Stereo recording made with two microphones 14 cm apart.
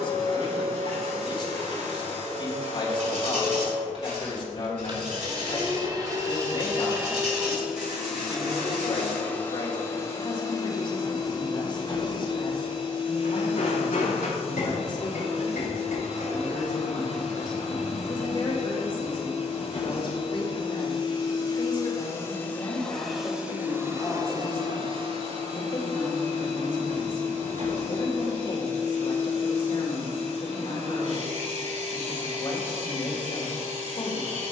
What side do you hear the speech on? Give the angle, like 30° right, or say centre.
40° left.